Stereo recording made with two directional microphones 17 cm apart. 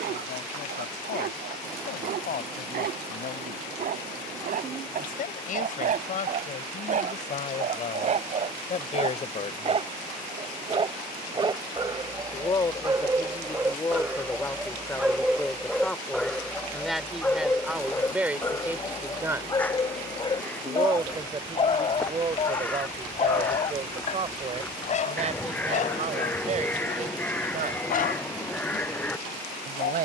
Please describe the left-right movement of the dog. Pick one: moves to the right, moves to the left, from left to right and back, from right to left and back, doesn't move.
moves to the left.